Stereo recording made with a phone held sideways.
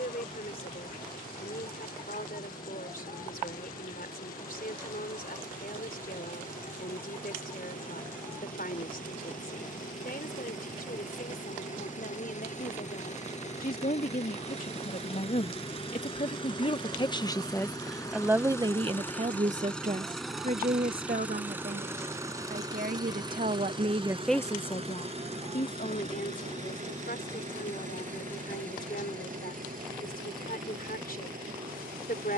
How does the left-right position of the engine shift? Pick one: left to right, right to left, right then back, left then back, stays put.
left to right.